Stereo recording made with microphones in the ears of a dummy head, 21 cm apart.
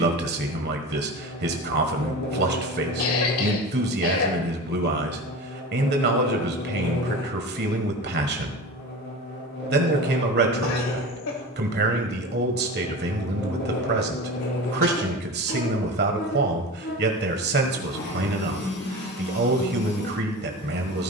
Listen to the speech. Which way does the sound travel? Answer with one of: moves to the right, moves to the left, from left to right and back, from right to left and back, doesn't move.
doesn't move.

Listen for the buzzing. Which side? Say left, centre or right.
left.